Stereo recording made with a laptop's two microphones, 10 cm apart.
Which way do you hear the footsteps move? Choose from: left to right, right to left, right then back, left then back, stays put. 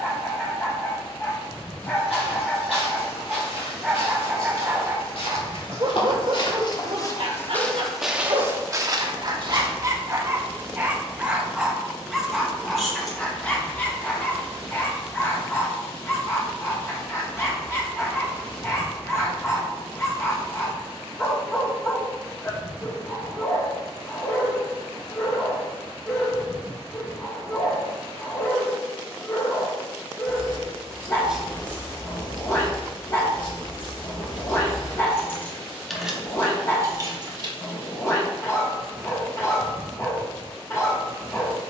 left to right.